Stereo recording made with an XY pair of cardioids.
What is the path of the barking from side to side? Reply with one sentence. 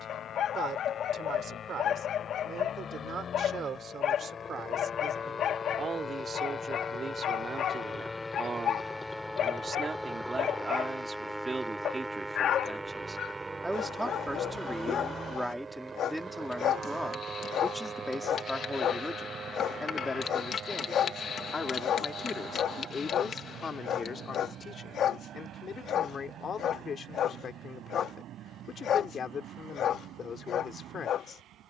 In this clip you hear the barking stay put.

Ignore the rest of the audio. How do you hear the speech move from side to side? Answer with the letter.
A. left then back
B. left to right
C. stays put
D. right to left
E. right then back
D.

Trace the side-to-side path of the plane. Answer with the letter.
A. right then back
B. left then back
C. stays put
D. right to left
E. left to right
E.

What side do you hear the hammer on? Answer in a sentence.
In this clip you hear the hammer on the left.